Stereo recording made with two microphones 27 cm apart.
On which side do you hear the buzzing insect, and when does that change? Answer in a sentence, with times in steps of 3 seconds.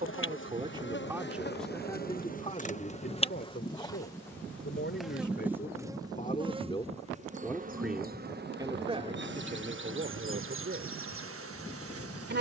You can hear the buzzing insect on the left from 0 s, in the centre from 3 s and on the right from 6 s.